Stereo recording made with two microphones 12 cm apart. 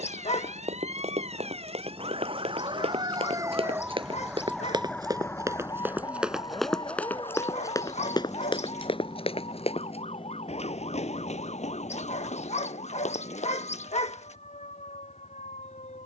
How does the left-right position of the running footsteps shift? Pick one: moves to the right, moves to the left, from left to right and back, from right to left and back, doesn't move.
moves to the left.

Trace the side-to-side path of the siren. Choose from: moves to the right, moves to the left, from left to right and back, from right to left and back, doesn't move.
moves to the left.